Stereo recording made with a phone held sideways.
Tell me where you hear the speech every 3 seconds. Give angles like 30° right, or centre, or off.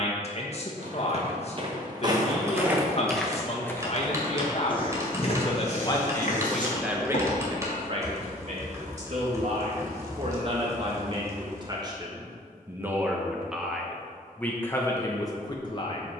40° left, 40° left, 20° right, 40° right, centre, 30° left.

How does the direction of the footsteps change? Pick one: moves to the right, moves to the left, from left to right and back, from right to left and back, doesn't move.
moves to the left.